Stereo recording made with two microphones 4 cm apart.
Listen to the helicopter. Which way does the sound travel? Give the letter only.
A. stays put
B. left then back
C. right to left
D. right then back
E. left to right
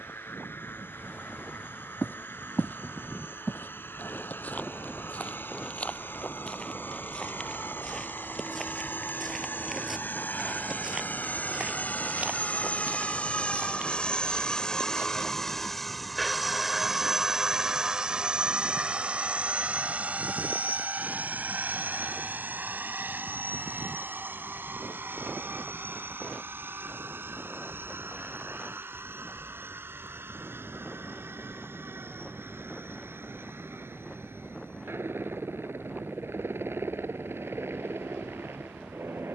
E.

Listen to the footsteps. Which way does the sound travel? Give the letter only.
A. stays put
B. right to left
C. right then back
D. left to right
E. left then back
D.